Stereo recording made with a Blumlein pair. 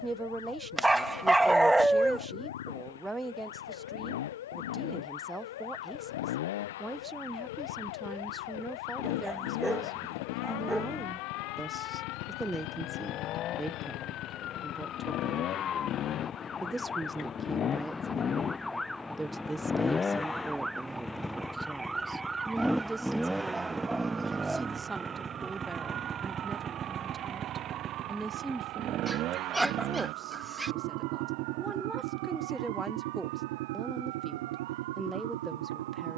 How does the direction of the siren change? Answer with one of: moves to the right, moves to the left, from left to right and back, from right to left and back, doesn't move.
moves to the right.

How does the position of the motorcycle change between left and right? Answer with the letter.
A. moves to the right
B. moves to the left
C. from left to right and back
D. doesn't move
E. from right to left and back
A.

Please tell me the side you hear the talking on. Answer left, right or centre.
centre.